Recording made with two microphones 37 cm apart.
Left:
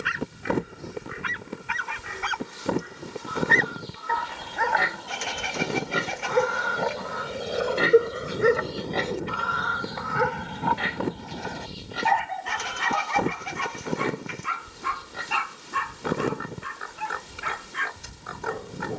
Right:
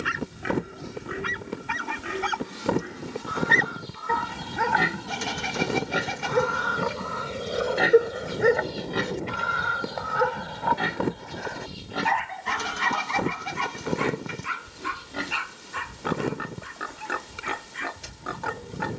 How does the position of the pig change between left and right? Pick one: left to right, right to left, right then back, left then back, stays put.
left then back.